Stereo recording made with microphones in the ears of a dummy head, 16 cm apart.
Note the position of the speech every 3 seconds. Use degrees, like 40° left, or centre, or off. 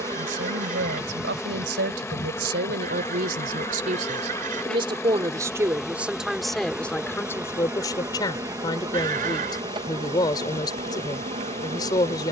70° right, 30° right, 10° left, 20° left.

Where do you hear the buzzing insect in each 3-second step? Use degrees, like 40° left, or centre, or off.
centre, 10° left, 10° right, 30° right.